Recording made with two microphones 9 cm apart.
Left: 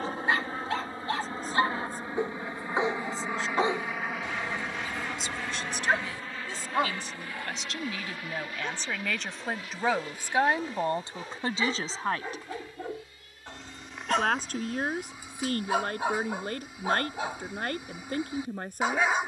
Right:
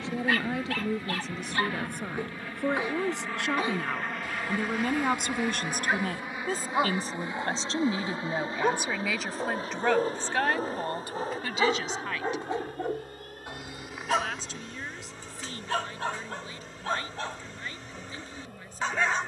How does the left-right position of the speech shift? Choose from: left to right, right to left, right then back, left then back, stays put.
right to left.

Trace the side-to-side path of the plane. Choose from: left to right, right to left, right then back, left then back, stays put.
left to right.